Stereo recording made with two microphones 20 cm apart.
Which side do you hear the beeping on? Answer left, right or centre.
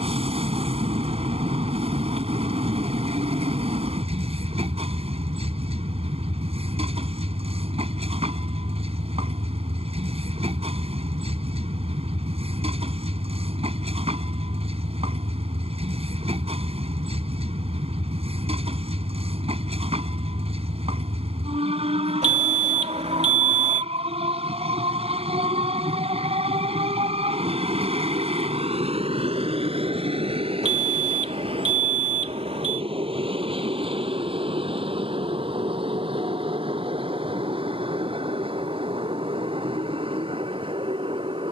right.